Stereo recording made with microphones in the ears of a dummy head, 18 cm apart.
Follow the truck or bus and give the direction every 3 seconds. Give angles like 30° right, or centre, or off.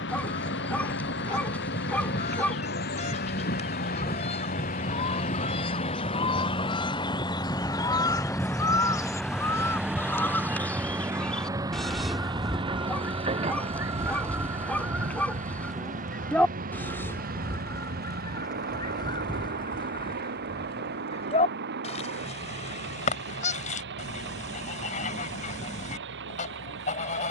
60° left, 40° left, 20° left, 10° right, 30° right, 40° right, 50° right, 60° right, 60° right.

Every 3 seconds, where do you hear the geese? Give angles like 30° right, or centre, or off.
30° left, 30° left, 20° left, 10° left, 10° right, 10° left, 20° left, 30° left, 40° left.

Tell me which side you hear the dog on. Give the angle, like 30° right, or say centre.
10° left.